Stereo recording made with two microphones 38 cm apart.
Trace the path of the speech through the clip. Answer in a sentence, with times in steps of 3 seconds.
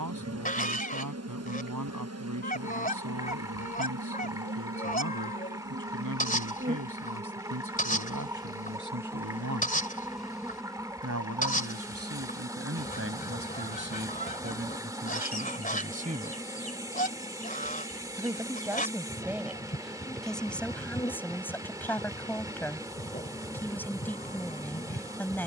In this clip you hear the speech on the right from 0 s and in the centre from 18 s.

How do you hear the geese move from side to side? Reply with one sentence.
You can hear the geese stay put.